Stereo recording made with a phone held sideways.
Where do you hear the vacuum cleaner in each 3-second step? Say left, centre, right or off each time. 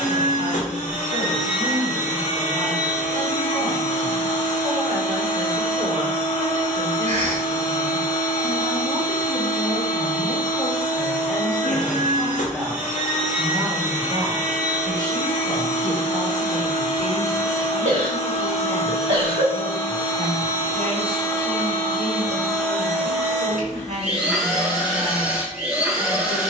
left, left, left, left, left, left, left, centre, centre.